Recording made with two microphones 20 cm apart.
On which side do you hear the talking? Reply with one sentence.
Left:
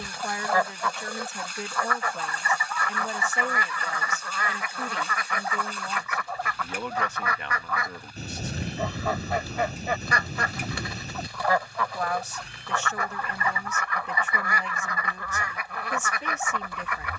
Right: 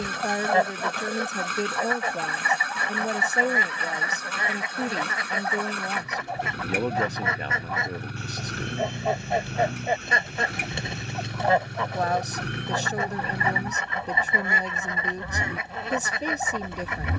You can hear the talking on the right.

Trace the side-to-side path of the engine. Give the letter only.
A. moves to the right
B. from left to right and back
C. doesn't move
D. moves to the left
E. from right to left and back
C.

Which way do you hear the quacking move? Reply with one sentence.
You can hear the quacking stay put.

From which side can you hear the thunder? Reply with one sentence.
You can hear the thunder on the left.